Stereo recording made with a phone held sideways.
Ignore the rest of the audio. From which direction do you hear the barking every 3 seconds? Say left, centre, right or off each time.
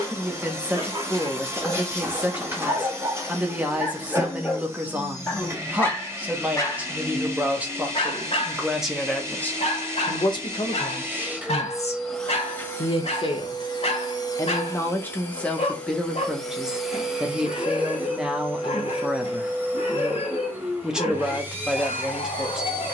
right, centre, left, left, left, left, left, left.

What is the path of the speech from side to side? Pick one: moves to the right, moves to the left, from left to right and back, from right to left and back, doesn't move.
from right to left and back.